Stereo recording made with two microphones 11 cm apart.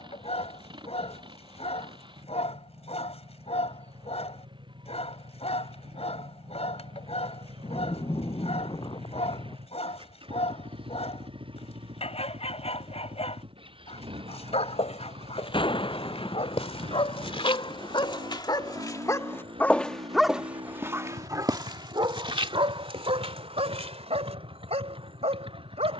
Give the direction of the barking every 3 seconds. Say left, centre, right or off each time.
left, left, left, left, left, left, left, right, right.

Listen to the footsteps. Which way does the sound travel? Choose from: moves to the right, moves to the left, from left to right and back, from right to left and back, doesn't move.
moves to the right.